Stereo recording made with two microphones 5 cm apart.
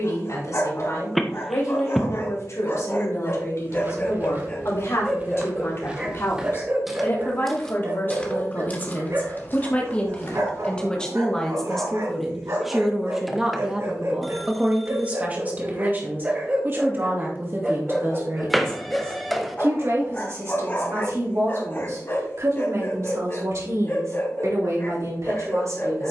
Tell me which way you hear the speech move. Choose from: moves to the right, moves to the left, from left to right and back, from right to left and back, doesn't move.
moves to the right.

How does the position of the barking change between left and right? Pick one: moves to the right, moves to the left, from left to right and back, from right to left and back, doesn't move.
from left to right and back.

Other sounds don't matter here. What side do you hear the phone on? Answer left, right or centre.
centre.